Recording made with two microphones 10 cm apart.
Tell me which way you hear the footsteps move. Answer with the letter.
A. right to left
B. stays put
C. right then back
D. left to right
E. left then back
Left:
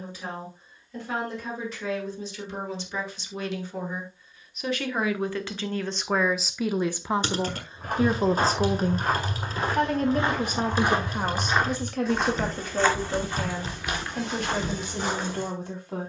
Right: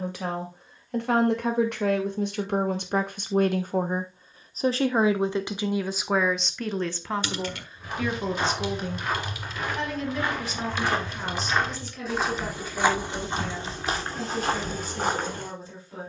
D.